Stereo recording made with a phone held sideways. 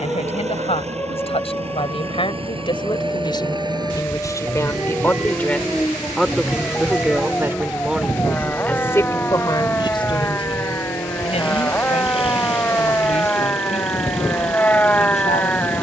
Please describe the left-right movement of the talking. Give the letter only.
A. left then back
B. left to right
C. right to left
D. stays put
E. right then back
E.